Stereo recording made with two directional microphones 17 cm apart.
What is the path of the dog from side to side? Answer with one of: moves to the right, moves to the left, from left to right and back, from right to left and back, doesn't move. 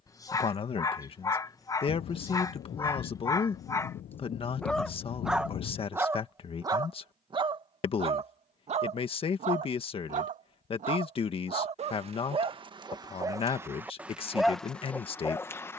from left to right and back.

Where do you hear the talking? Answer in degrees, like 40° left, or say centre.
30° left.